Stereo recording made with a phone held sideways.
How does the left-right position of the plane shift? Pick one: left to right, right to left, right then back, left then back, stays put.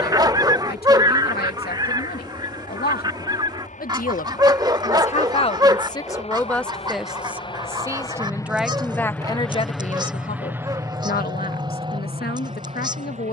left to right.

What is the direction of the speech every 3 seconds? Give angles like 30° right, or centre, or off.
80° left, 50° left, centre, 50° left, 80° left.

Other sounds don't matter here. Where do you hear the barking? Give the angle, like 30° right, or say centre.
20° right.